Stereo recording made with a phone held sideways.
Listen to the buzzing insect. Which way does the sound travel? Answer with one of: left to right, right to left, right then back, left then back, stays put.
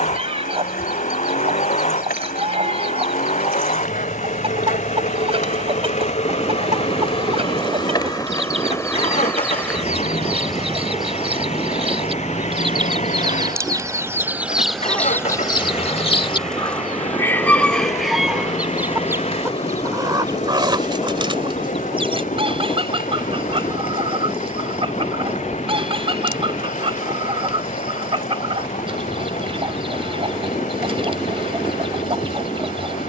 right then back.